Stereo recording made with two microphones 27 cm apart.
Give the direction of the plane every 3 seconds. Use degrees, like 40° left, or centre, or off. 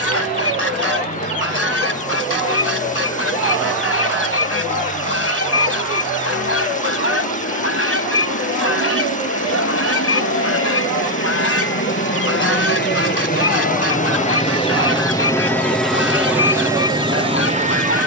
70° left, 70° left, 70° left, 60° left, 30° left, 10° right.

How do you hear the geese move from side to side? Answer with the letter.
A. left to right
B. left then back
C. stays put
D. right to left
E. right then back
C.